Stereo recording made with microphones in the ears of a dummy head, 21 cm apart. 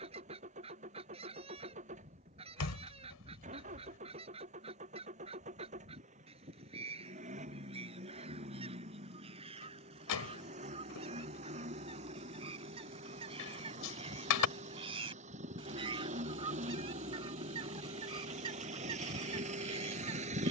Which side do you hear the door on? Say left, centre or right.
left.